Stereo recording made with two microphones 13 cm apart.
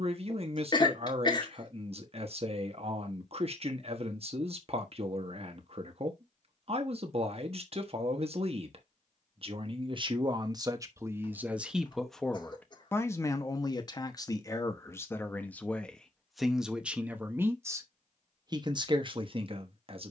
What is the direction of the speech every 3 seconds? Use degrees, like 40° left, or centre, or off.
50° right, 50° right, 50° right, 30° right, 20° left, centre, 40° right.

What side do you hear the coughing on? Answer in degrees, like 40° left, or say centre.
30° left.